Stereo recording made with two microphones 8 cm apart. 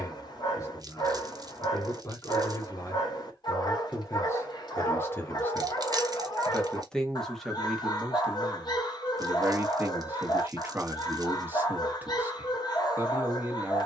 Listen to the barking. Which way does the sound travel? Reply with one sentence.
You can hear the barking stay put.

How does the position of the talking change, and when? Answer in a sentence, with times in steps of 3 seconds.
In this clip you hear the talking on the left from 0 s, in the centre from 6 s and on the right from 9 s.